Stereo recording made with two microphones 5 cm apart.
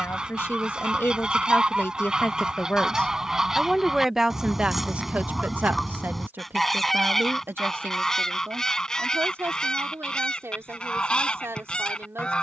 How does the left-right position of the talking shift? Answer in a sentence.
In this clip you hear the talking move from left to right.